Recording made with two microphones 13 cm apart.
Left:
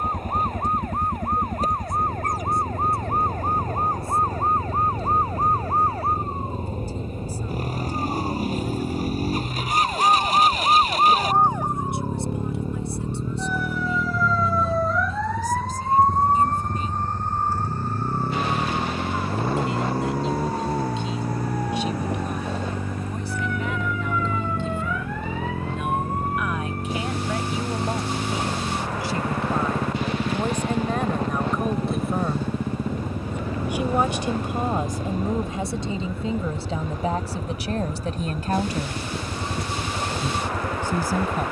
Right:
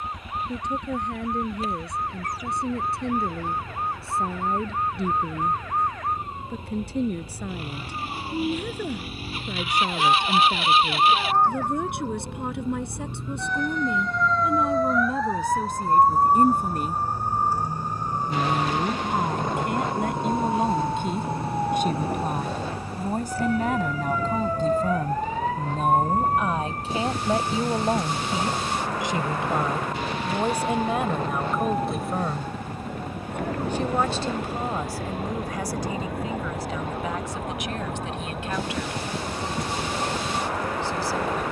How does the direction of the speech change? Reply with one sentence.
You can hear the speech move from right to left.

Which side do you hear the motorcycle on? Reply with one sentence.
In this clip you hear the motorcycle on the left.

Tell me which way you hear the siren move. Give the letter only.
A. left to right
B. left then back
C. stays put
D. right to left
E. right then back
A.